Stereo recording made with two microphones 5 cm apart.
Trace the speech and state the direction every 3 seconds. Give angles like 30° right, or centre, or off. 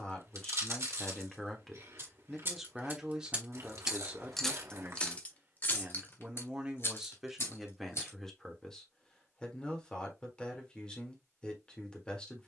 10° left, 20° right, centre, 20° left.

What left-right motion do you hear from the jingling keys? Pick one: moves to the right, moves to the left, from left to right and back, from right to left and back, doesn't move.
moves to the left.